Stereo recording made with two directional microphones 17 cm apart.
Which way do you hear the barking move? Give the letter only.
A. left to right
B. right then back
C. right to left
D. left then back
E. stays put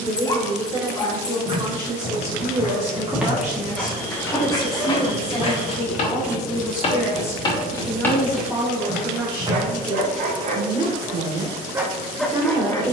B.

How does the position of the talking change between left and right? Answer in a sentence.
You can hear the talking go left and come back.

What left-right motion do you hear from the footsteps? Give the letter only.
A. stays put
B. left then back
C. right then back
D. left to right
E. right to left
B.